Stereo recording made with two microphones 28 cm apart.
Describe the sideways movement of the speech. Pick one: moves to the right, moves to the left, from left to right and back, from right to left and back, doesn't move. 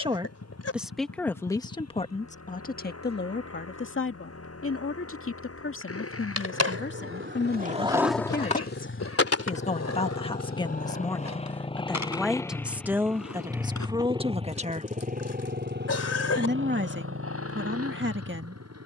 from right to left and back.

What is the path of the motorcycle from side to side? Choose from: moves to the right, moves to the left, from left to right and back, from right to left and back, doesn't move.
moves to the right.